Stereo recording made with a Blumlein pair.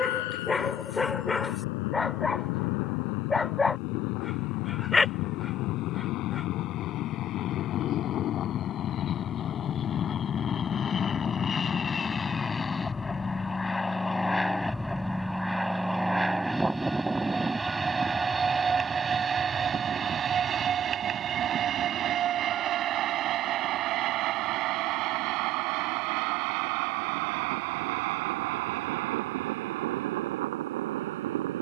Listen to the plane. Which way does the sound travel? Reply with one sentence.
In this clip you hear the plane travel towards the right.